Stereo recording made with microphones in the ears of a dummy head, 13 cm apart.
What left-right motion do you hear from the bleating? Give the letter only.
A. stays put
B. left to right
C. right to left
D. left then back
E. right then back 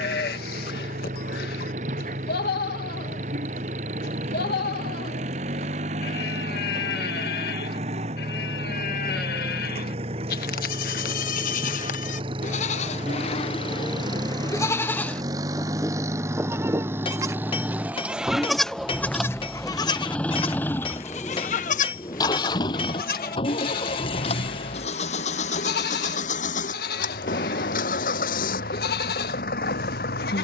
E.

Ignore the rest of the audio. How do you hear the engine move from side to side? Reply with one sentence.
In this clip you hear the engine go from the right side to the left.